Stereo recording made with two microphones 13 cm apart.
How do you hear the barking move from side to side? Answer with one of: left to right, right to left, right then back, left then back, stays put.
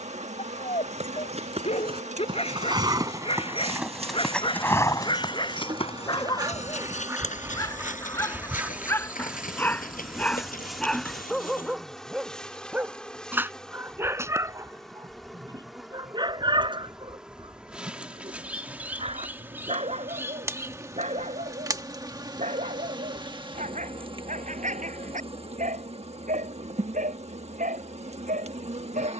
left to right.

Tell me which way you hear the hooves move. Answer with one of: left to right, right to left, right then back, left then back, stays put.
right to left.